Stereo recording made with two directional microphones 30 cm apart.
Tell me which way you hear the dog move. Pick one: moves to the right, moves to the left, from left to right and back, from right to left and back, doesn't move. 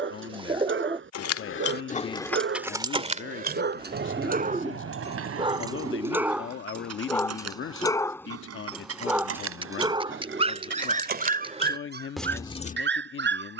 from right to left and back.